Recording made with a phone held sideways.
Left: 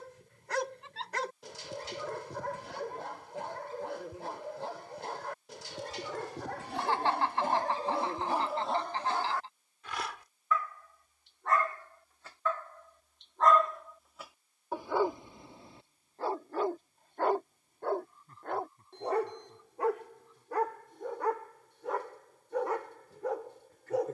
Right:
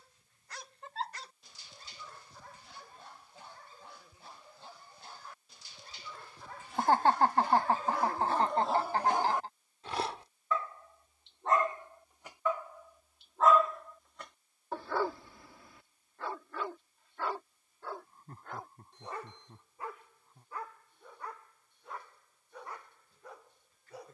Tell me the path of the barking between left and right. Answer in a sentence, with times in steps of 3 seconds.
You can hear the barking on the left from 0 s, on the right from 9 s, in the centre from 12 s and on the left from 15 s.